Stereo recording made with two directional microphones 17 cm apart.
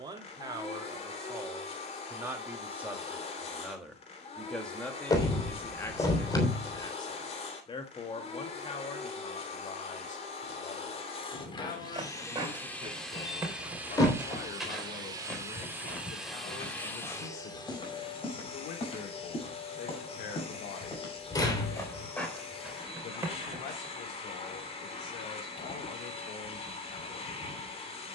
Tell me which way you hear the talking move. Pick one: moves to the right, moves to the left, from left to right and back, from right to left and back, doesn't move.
moves to the left.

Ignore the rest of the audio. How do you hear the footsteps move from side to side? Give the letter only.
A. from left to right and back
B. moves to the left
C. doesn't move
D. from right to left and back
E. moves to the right
D.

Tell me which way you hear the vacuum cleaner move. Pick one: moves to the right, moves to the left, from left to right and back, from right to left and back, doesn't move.
from left to right and back.